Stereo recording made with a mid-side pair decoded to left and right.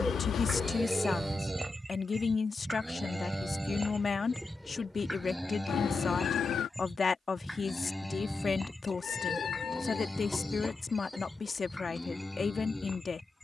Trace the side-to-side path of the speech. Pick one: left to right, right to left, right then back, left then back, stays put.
stays put.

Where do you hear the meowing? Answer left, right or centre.
left.